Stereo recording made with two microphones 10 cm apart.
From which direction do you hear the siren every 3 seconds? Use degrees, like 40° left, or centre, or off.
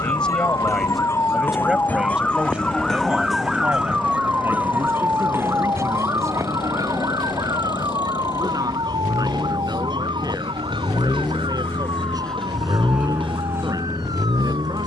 20° left, 10° right, 40° right, 50° right, 60° right.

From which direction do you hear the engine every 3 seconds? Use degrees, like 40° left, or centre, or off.
60° left, 60° left, 50° left, 30° left, 20° right.